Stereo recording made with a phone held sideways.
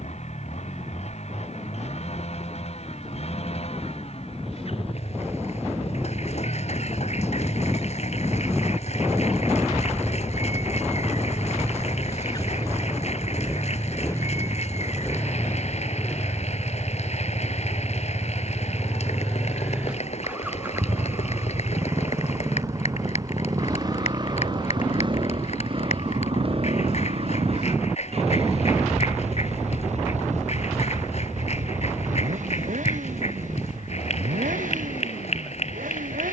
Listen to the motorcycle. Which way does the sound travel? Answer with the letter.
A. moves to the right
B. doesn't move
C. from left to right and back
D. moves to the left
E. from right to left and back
A.